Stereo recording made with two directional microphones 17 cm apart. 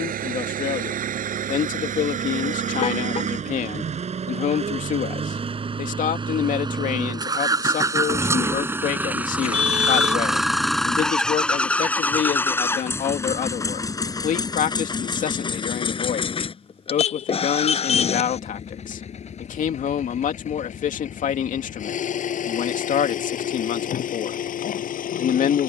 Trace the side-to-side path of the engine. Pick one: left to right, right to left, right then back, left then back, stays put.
right to left.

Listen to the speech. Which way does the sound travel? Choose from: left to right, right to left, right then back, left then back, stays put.
stays put.